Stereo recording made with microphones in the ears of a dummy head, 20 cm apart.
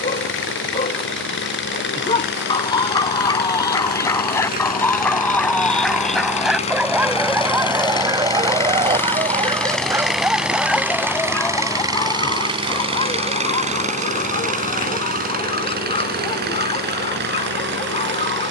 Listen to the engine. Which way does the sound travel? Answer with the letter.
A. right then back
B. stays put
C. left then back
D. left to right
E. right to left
D.